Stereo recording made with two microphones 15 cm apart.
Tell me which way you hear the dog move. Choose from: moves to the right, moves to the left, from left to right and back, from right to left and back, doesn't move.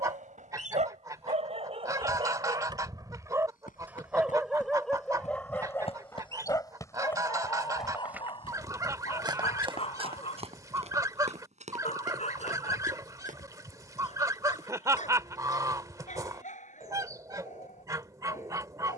moves to the left.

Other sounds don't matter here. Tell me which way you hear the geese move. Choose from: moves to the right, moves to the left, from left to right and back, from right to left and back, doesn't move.
doesn't move.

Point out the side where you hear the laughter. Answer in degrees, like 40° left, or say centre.
20° right.